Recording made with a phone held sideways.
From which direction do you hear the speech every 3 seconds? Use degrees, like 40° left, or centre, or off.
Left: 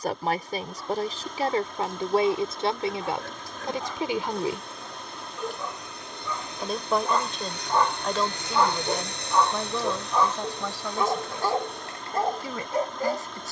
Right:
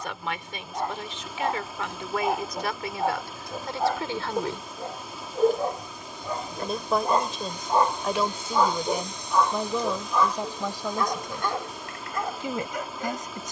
40° left, 20° left, centre, 10° right, 20° right.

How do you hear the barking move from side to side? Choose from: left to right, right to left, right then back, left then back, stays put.
right to left.